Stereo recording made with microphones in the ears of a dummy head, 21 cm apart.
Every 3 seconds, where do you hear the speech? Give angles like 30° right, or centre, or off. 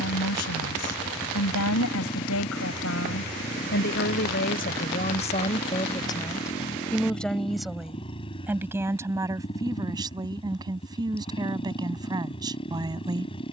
70° left, 40° left, centre, 20° right, 20° right.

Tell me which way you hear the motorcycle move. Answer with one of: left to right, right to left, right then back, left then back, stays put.
stays put.